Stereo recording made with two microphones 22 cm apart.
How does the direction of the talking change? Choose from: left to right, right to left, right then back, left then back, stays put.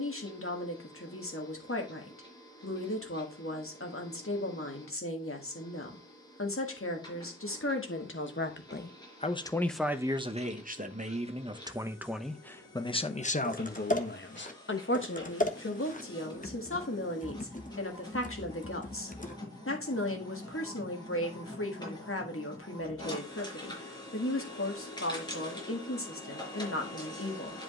right then back.